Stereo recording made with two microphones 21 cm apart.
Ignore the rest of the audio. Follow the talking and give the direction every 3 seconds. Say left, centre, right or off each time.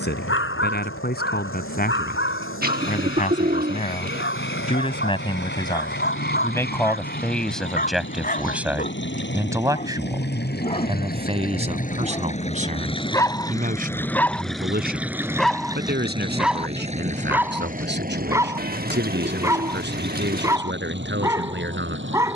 left, left, centre, right, right, right, right, right.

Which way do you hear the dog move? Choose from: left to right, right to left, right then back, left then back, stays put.
left to right.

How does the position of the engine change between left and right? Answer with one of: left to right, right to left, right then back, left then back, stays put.
left to right.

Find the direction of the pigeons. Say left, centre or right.
right.